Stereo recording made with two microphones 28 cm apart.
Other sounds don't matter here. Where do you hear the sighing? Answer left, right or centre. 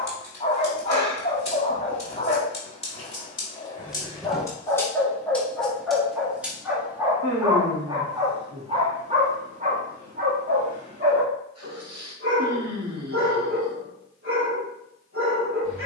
right.